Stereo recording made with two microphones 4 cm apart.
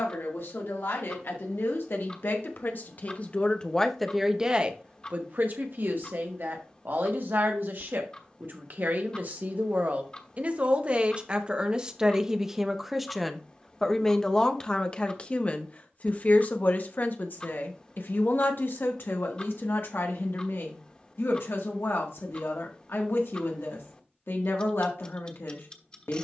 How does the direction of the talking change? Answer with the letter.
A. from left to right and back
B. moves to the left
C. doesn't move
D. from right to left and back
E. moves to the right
A.